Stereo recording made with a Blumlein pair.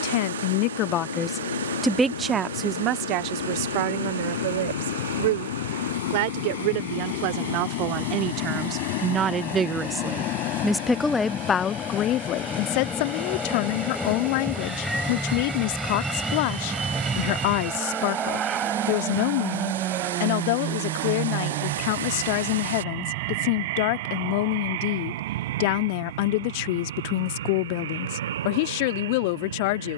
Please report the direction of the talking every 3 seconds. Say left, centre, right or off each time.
centre, right, right, centre, left, left, left, left, left, left.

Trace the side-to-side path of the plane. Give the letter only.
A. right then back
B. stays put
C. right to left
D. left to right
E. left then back
D.